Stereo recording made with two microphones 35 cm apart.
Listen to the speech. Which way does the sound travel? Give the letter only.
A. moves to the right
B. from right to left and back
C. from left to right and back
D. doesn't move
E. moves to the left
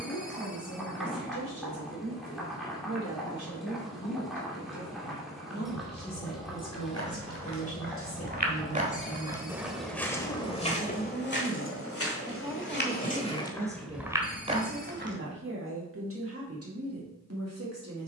A.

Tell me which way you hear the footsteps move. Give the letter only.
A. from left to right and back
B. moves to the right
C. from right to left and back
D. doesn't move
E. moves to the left
C.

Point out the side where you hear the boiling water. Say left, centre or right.
centre.